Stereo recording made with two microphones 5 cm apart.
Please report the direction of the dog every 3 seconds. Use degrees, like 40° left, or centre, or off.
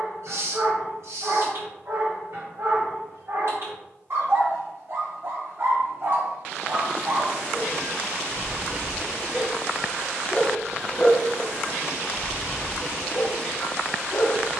70° right, 60° right, 40° right, 10° right, 40° left.